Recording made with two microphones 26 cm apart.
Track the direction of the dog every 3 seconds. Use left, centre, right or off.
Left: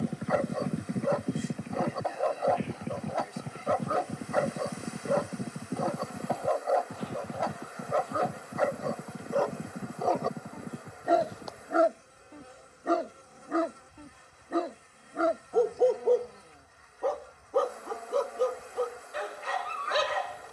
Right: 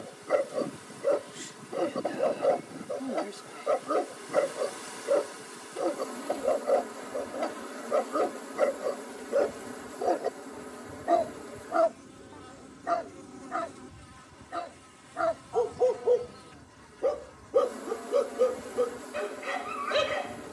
right, right, right, centre, left, centre, right.